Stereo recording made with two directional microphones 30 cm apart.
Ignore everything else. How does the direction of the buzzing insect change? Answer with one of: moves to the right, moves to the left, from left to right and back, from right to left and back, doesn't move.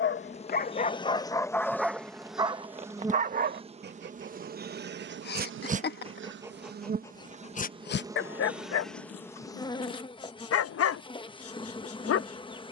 from left to right and back.